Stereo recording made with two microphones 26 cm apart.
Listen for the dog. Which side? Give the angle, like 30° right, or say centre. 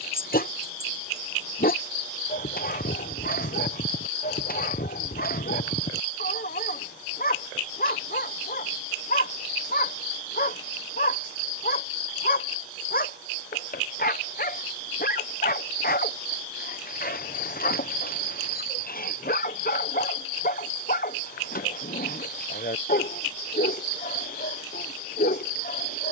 40° left.